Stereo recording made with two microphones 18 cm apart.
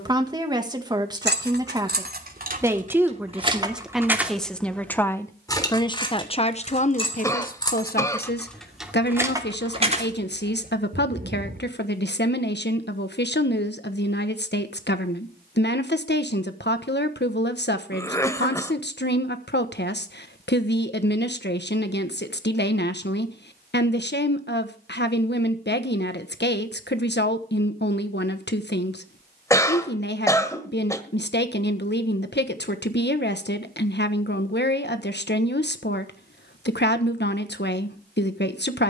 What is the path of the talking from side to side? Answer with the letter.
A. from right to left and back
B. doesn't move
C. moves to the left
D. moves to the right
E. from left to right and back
C.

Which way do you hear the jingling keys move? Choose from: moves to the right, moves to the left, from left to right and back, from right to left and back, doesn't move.
from right to left and back.